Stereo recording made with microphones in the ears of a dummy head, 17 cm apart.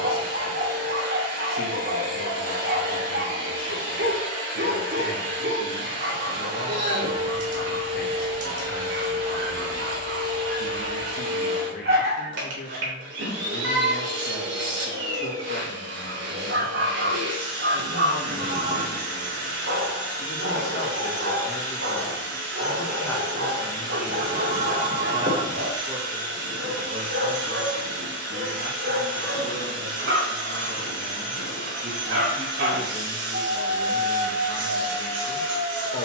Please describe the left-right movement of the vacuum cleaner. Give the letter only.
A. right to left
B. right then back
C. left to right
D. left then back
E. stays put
E.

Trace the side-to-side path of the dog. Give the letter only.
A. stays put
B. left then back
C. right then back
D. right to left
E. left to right
A.